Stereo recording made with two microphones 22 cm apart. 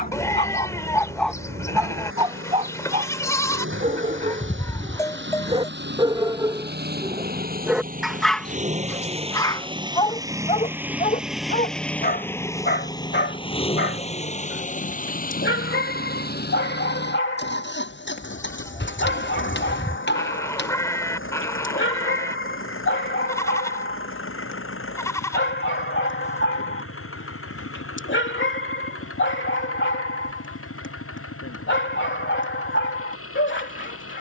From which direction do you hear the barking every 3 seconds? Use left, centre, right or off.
centre, right, centre, left, left, left, left, left, left, left, left, left.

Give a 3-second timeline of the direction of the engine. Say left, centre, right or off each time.
right, right, right, centre, left, left, left, left, left, left, left, left.